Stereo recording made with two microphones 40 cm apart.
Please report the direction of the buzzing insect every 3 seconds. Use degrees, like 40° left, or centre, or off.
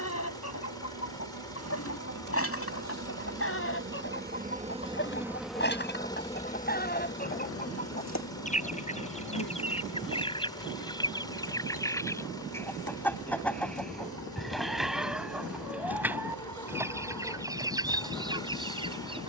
50° right, 20° right, 30° left, 60° left, 60° left, 60° left, 60° left.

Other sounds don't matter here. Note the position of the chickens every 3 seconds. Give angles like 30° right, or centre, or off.
40° left, 30° left, 20° left, 10° left, centre, 10° right, 10° right.